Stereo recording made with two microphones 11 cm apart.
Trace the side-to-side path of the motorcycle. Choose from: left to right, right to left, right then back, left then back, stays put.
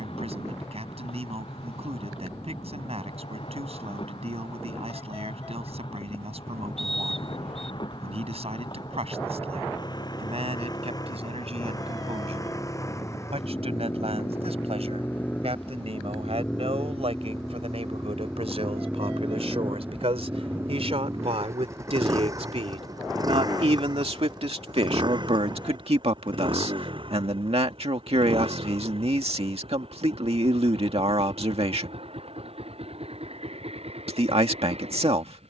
left to right.